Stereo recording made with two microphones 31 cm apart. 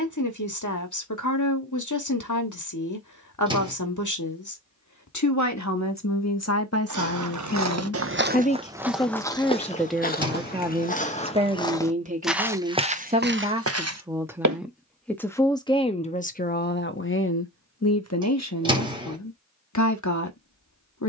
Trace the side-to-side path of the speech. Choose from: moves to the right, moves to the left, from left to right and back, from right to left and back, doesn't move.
from left to right and back.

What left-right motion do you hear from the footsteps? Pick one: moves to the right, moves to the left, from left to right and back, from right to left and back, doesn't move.
from right to left and back.